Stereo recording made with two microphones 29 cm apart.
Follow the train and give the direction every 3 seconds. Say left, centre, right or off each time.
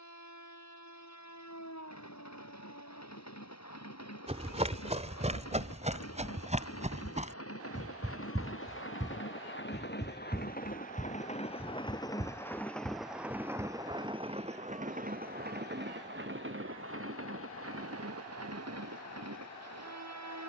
left, left, left, left, centre, right, right.